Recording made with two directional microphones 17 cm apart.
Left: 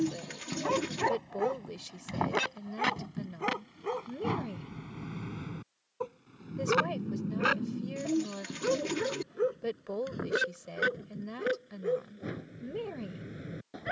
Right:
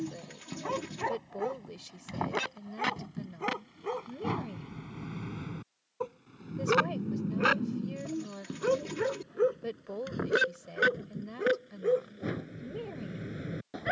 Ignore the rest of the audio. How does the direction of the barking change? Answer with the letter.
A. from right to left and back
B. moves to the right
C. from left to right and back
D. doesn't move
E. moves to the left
B.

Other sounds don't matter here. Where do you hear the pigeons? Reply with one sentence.
In this clip you hear the pigeons on the left.